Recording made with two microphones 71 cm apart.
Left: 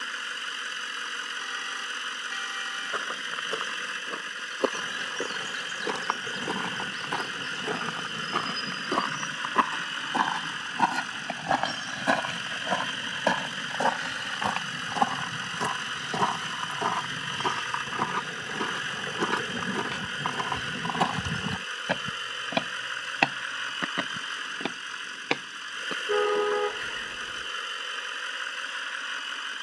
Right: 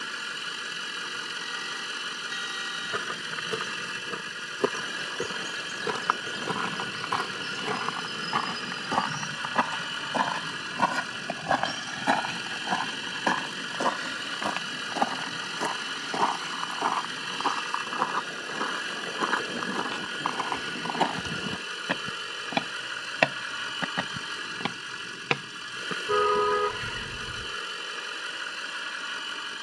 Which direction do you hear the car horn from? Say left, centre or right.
right.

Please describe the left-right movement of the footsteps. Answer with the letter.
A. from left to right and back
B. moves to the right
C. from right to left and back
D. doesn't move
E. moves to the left
C.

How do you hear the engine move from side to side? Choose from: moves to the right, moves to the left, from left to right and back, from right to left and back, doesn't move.
doesn't move.